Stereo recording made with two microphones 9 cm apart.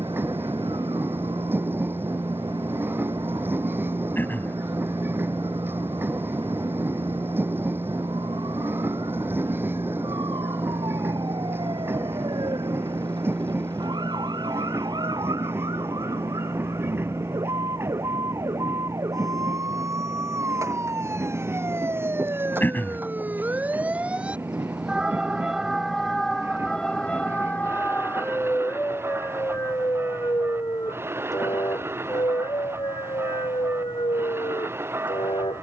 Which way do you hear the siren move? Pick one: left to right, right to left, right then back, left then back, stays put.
right to left.